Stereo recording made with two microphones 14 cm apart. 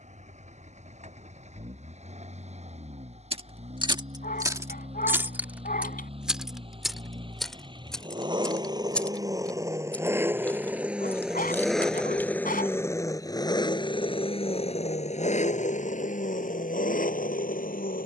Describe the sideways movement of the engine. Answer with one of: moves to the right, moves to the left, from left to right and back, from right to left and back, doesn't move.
moves to the left.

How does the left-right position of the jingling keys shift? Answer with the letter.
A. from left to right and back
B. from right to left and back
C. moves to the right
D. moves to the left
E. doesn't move
D.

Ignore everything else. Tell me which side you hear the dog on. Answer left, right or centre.
left.